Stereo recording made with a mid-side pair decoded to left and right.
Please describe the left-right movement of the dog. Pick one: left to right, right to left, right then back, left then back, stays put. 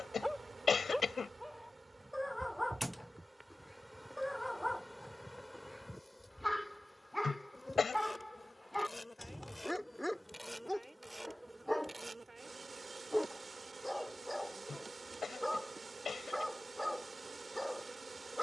stays put.